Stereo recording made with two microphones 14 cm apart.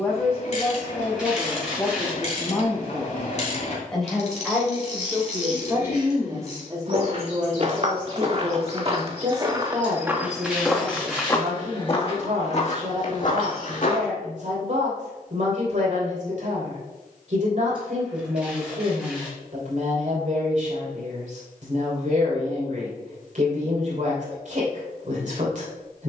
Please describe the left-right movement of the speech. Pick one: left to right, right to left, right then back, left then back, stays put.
left to right.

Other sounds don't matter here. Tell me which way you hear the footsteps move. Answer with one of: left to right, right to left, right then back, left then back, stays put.
right to left.